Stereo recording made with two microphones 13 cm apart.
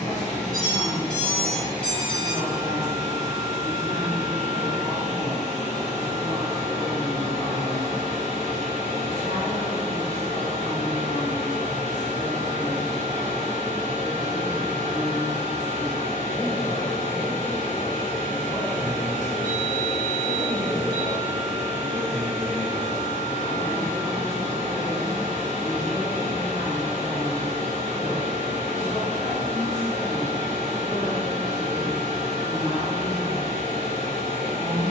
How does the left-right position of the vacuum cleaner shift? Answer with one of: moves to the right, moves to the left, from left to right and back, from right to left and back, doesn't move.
doesn't move.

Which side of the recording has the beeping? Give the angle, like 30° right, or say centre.
10° left.